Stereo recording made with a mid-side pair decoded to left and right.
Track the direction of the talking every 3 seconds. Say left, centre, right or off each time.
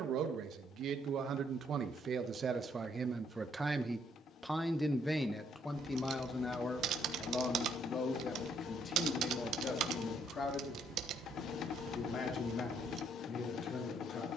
right, centre, left, left, left.